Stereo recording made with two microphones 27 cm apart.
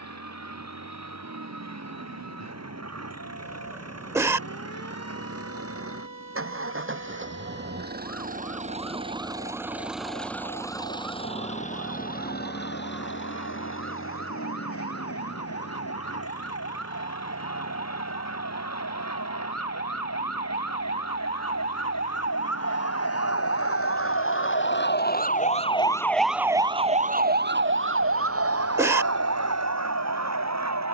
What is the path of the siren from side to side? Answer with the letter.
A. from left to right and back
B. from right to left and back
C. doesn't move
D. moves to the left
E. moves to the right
E.